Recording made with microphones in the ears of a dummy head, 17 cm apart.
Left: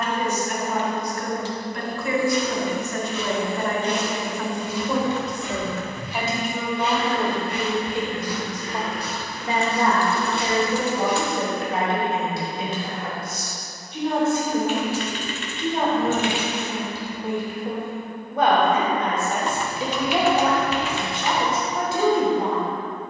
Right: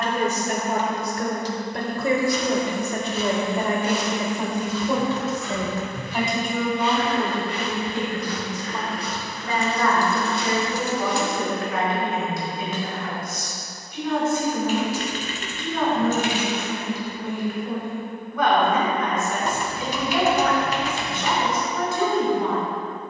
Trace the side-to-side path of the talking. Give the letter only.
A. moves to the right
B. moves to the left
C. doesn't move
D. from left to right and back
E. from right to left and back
B.